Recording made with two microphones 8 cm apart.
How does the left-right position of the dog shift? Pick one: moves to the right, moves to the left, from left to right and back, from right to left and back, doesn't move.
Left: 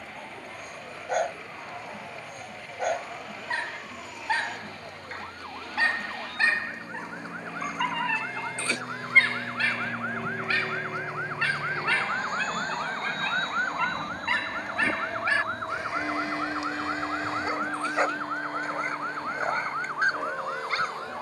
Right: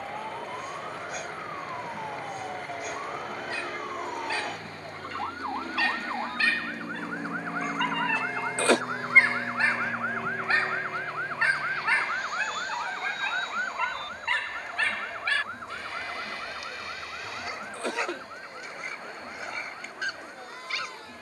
from left to right and back.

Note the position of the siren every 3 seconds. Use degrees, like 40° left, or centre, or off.
50° right, 40° right, 30° right, 10° right, 10° left, 30° left, 50° left.